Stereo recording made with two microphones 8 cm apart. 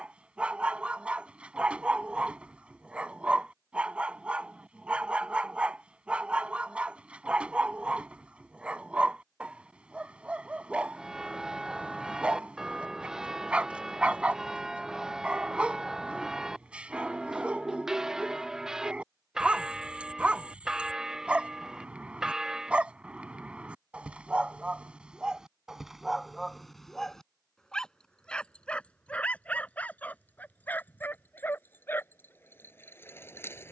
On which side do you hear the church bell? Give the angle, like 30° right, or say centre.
10° right.